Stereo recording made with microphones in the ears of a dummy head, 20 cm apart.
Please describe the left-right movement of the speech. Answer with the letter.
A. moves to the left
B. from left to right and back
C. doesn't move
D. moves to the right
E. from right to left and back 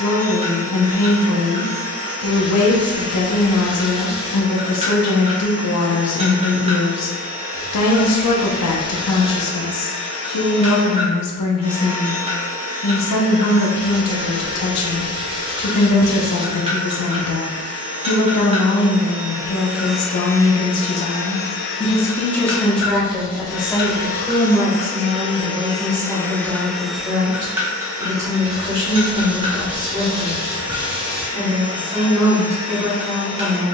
D.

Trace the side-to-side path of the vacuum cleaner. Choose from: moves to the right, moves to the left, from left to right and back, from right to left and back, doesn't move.
from right to left and back.